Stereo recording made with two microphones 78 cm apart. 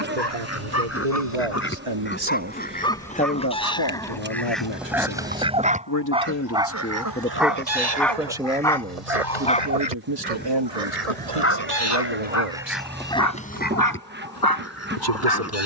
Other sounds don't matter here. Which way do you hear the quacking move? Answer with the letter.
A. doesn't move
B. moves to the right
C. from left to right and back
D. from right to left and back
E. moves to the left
C.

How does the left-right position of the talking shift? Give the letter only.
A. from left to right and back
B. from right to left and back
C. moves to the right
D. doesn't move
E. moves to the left
B.